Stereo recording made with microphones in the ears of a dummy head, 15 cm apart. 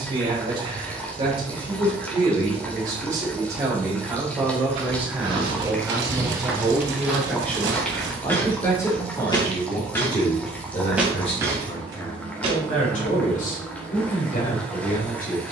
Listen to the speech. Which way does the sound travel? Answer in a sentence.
You can hear the speech go from the right side to the left.